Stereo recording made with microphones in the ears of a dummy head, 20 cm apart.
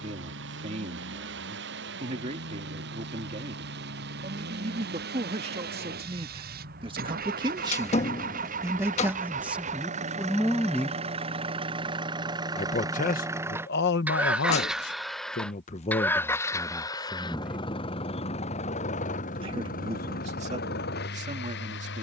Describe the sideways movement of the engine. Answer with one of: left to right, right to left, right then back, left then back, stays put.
right to left.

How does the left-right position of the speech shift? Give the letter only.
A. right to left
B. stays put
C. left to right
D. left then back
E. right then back
D.